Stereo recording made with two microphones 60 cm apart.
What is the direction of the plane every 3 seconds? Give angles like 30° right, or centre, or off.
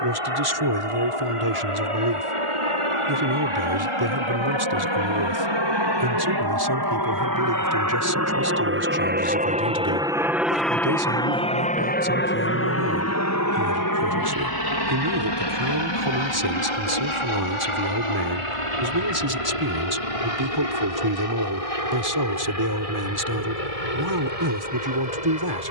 60° right, 50° right, 30° right, centre, 30° left, 40° left, 50° left, 60° left, 60° left.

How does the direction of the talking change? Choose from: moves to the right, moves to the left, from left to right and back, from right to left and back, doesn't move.
doesn't move.